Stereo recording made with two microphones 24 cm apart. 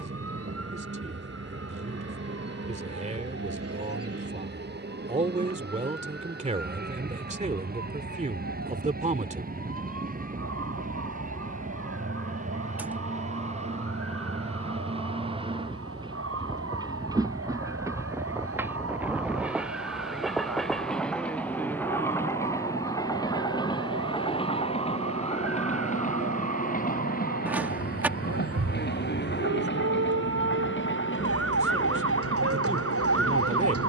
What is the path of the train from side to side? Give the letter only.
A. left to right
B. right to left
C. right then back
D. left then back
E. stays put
B.